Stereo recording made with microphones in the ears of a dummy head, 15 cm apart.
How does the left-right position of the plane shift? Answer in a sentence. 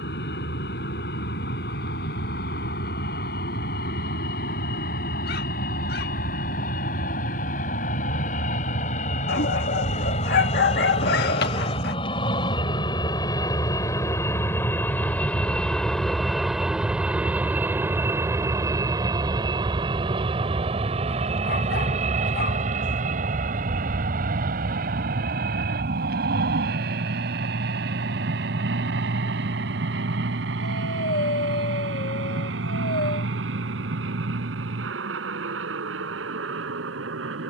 You can hear the plane go from the left side to the right.